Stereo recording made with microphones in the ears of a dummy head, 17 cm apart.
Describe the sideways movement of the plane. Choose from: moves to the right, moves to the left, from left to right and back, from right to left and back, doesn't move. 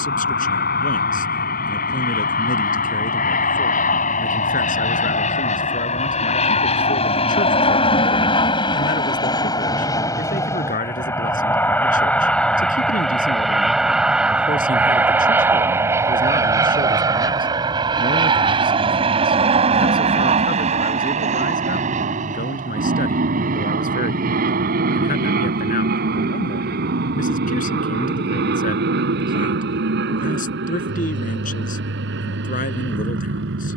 moves to the right.